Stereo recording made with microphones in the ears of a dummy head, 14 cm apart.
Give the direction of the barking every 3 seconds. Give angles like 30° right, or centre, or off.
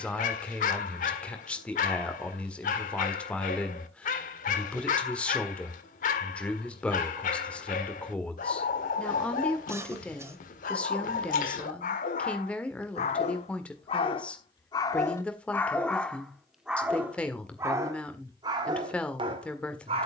50° left, 50° left, 50° left, 50° left, 40° left, centre, 30° right.